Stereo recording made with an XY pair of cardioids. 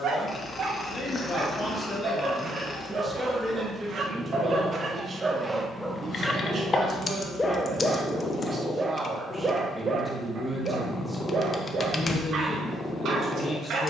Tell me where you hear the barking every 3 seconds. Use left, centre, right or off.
right, right, centre, right, right.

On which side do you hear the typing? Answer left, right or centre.
left.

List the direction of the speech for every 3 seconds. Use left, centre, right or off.
left, right, right, centre, left.